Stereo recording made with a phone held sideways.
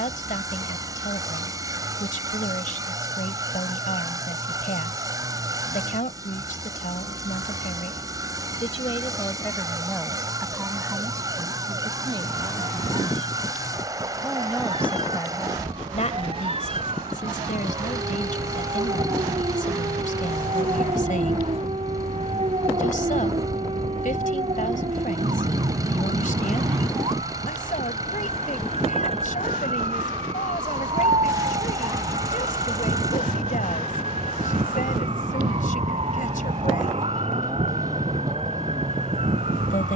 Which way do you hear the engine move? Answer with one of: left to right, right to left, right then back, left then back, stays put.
stays put.